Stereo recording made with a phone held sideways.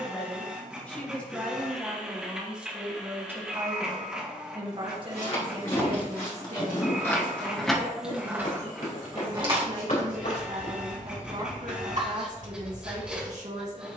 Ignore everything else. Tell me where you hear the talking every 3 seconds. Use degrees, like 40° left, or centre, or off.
centre, 30° right, 60° right, 60° right, 60° right.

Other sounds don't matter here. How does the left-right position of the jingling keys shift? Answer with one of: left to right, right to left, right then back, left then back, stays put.
left to right.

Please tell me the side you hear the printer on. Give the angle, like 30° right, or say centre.
10° right.